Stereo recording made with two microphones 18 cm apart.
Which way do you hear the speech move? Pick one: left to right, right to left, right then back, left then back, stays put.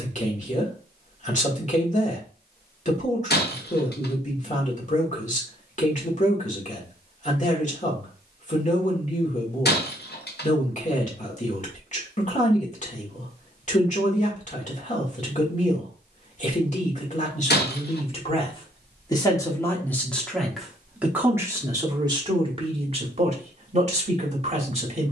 left to right.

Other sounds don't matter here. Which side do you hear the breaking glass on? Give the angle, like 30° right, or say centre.
70° left.